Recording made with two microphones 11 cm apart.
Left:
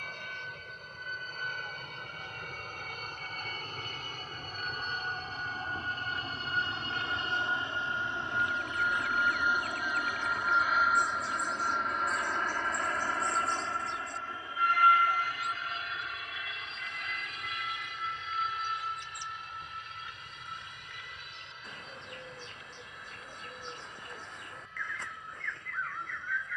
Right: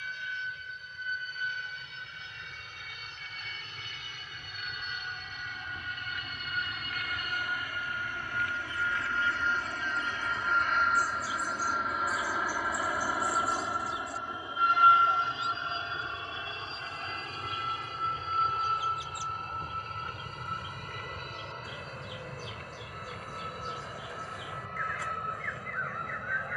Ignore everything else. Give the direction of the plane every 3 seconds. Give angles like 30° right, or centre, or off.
50° left, 40° left, 30° left, 10° left, 10° right, 30° right, 40° right, 50° right, 50° right.